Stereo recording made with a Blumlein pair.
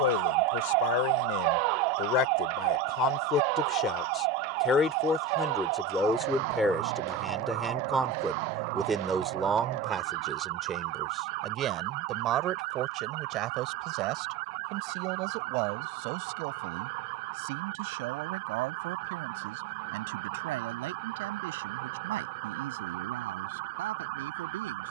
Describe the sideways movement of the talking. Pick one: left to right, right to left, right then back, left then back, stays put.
left to right.